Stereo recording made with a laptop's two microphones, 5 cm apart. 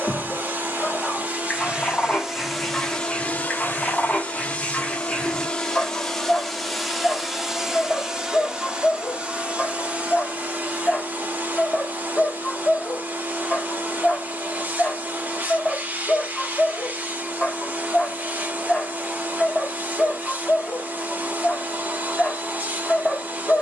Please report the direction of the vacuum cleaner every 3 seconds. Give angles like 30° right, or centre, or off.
20° right, 30° left, 10° right, 30° right, 40° right, 40° right, 40° right, 40° right.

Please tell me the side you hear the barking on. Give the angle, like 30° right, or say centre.
10° left.